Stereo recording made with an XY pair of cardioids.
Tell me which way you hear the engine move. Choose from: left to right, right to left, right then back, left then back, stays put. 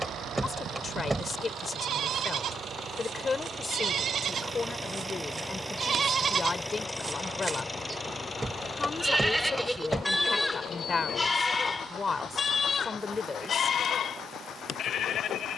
right to left.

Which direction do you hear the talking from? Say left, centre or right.
left.